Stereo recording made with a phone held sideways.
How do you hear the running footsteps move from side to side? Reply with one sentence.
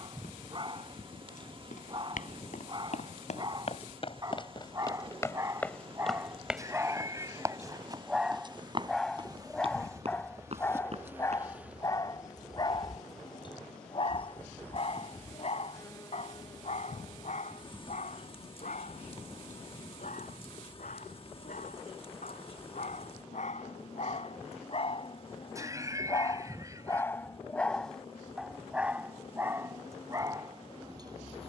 In this clip you hear the running footsteps move to the right.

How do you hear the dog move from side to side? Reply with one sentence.
In this clip you hear the dog move from right to left and back again.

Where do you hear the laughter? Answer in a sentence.
You can hear the laughter on the right.